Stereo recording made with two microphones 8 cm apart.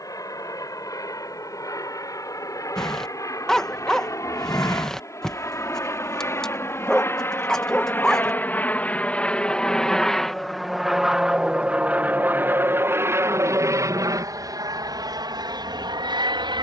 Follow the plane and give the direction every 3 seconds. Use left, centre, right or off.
left, left, left, centre, right, right.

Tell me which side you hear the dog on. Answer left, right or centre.
centre.